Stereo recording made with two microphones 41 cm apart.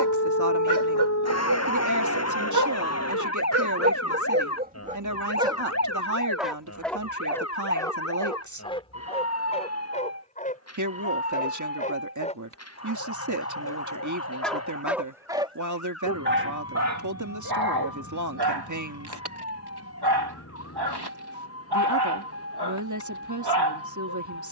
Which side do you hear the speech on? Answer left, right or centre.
right.